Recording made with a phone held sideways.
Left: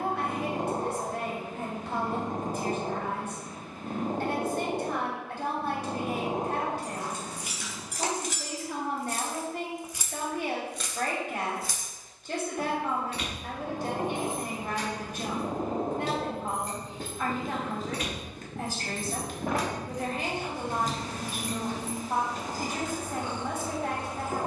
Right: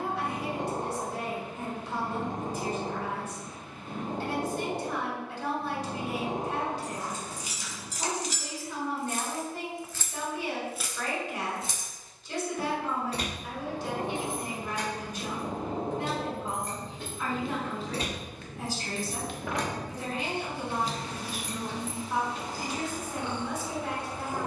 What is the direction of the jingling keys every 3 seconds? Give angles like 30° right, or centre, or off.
off, off, 60° left, 10° left, 40° right, 50° right, centre, 50° left.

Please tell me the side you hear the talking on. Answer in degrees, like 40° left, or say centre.
60° left.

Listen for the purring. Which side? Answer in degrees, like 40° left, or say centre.
40° left.